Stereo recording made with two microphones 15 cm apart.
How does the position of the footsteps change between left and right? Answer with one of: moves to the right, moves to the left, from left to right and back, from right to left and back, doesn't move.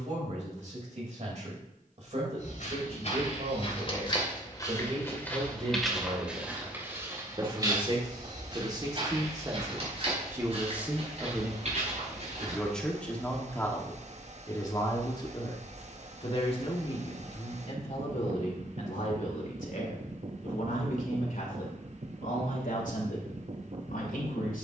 moves to the right.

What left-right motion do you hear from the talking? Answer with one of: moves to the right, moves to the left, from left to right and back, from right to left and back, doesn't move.
moves to the left.